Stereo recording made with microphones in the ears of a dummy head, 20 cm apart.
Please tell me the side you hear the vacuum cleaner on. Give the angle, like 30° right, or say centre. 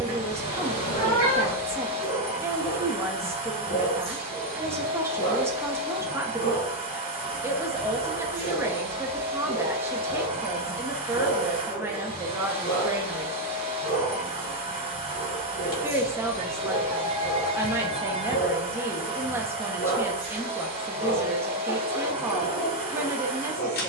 30° right.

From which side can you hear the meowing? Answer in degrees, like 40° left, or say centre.
30° left.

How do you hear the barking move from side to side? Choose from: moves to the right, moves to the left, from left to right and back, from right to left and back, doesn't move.
doesn't move.